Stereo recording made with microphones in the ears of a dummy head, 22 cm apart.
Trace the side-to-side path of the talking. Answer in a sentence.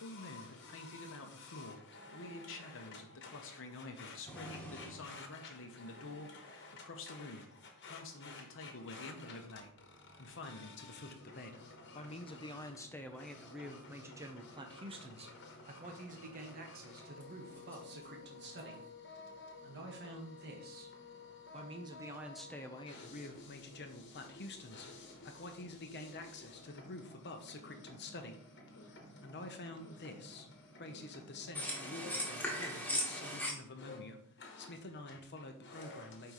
In this clip you hear the talking move from left to right and back again.